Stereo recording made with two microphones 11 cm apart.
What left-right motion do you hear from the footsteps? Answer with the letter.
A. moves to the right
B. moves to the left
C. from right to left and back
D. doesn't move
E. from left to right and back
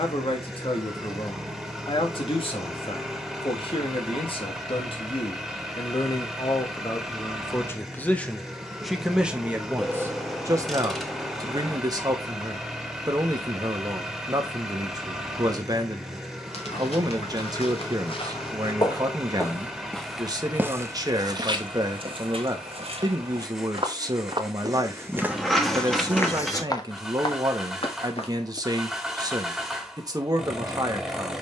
E.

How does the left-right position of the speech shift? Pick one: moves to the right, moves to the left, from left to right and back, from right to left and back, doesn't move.
moves to the right.